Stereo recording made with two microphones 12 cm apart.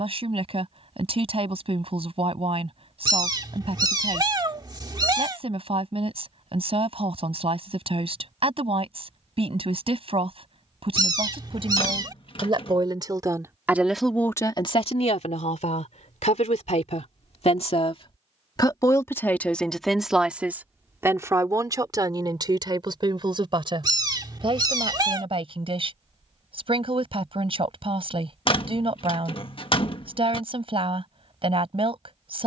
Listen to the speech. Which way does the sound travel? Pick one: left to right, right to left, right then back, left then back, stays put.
left then back.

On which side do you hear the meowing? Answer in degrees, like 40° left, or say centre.
40° right.